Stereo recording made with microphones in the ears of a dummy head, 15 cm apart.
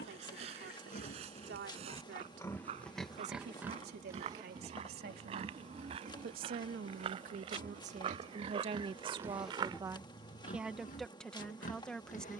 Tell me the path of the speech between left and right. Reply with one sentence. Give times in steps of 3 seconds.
You can hear the speech on the right from 0 s and in the centre from 9 s.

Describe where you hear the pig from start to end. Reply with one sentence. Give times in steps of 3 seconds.
In this clip you hear the pig on the left from 0 s, on the right from 3 s and on the left from 9 s.